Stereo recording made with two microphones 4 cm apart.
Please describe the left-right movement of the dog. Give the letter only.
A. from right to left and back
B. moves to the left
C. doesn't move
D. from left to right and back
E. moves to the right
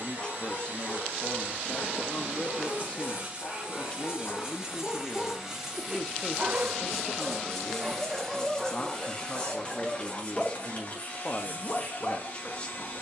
D.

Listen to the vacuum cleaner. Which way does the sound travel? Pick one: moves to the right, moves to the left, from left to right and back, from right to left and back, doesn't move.
moves to the left.